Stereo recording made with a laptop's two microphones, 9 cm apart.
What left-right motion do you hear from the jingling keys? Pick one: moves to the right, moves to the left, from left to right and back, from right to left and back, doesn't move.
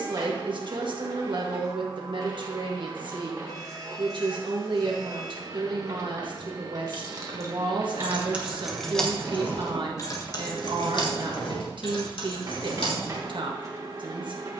moves to the left.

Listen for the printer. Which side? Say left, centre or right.
right.